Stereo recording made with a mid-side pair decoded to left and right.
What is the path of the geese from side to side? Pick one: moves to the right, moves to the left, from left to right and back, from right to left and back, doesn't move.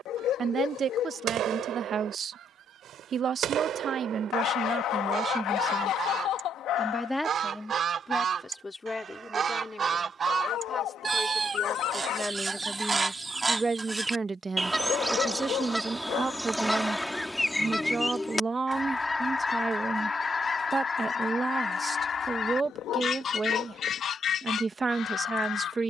moves to the left.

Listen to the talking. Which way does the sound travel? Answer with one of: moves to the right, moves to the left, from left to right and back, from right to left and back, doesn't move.
from right to left and back.